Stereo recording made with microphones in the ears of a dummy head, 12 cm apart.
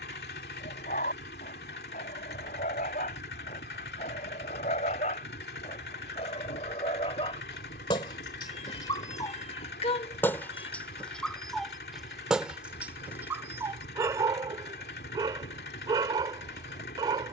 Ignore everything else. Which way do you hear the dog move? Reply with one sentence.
In this clip you hear the dog move from left to right.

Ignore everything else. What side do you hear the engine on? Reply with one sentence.
You can hear the engine on the left.